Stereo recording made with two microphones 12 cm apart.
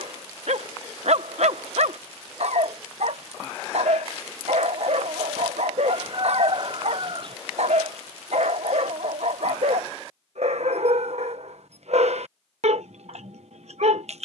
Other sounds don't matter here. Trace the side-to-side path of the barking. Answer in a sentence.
In this clip you hear the barking stay in one place.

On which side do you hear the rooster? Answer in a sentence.
You can hear the rooster on the right.